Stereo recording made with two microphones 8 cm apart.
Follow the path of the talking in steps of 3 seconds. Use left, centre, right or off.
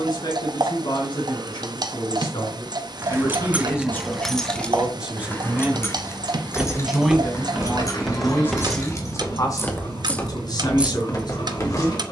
left, centre, centre, left.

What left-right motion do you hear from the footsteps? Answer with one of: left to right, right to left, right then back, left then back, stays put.
right to left.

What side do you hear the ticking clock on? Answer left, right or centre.
right.